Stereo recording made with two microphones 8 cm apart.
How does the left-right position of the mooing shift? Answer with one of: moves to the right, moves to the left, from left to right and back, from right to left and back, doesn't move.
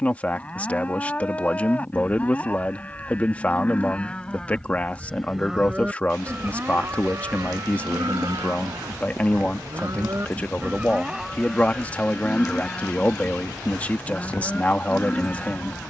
from left to right and back.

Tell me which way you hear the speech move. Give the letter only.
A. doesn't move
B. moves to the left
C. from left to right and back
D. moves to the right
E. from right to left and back
A.